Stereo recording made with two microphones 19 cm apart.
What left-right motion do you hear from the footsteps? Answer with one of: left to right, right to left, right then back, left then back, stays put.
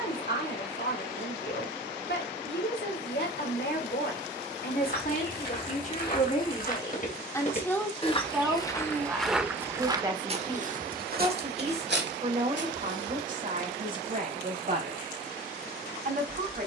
left to right.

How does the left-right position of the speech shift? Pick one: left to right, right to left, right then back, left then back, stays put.
left to right.